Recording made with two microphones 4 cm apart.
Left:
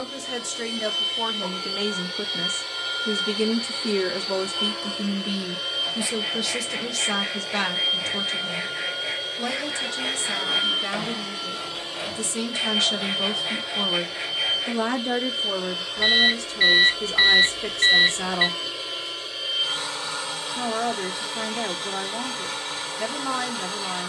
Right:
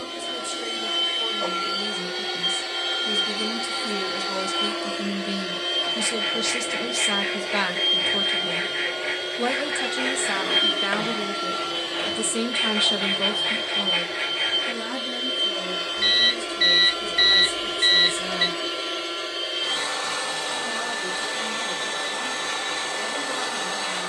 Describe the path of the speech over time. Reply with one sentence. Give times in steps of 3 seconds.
In this clip you hear the speech on the left from 0 s, in the centre from 6 s, on the right from 9 s, in the centre from 12 s and on the left from 15 s.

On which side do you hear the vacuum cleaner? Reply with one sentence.
In this clip you hear the vacuum cleaner on the right.